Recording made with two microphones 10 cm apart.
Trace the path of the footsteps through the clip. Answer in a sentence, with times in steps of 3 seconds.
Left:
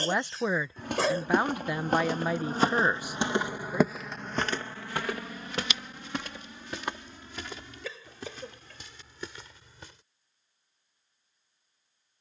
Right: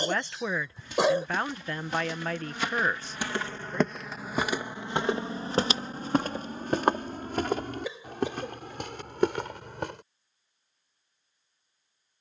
You can hear the footsteps on the left from 0 s, in the centre from 3 s and on the right from 6 s.